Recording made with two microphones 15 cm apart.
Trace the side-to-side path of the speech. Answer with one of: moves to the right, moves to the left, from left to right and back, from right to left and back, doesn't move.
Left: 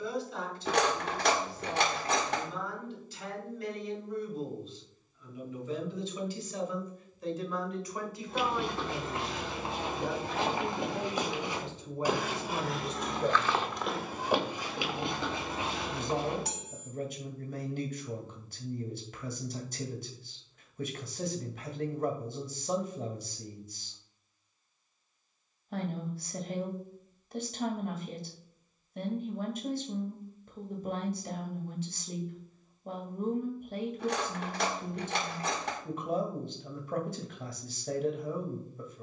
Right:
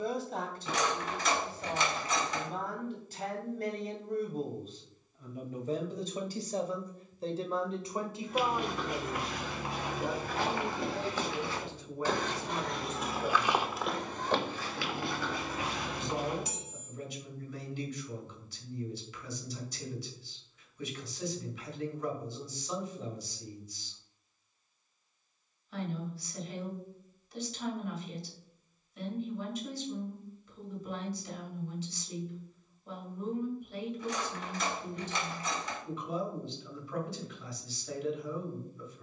moves to the left.